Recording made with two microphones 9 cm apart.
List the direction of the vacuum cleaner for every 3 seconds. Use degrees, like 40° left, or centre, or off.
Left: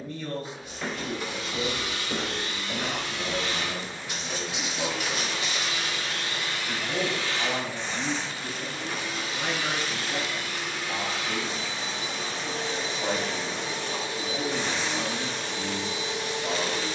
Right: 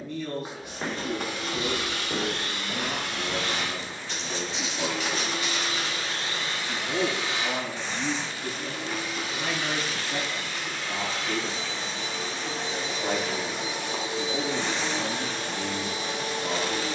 50° right, 50° right, 20° right, 10° left, 10° right, 40° right.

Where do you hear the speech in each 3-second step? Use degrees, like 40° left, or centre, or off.
30° left, 30° left, 20° left, 10° left, centre, 10° right.